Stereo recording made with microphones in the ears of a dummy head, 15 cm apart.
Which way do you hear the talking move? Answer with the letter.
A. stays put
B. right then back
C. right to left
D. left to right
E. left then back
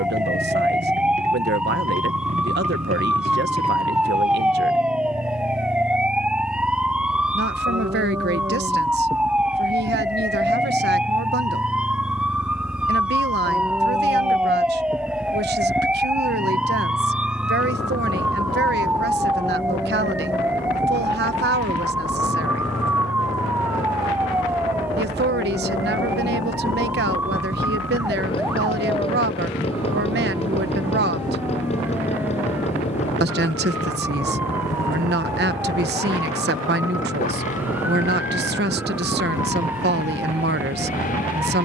A.